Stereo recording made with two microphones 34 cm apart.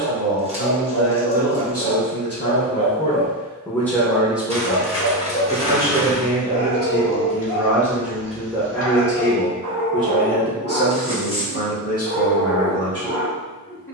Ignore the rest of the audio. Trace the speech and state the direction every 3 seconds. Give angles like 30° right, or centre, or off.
40° left, centre, 10° right, 30° left, 40° left.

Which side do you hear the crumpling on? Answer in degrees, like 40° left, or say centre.
20° right.